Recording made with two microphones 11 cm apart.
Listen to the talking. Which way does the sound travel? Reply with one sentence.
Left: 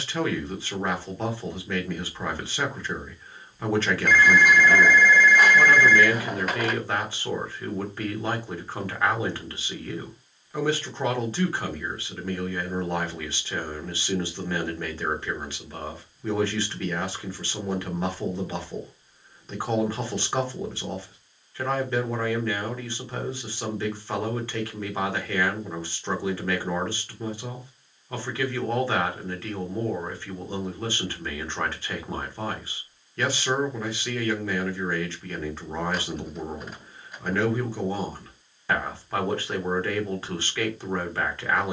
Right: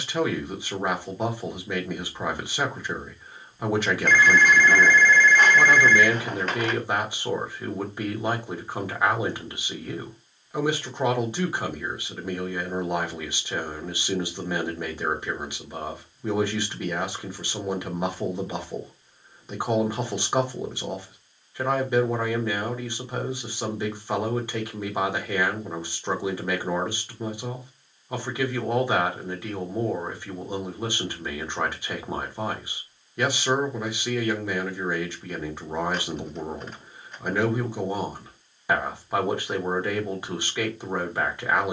In this clip you hear the talking stay in one place.